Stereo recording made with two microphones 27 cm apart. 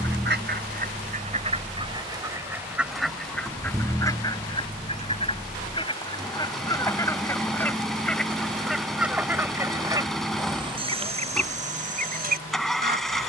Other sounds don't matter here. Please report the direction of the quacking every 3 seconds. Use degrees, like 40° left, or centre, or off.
20° right, 10° left, 10° left, 20° right, 40° right.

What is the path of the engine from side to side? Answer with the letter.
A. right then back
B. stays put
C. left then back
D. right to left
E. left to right
B.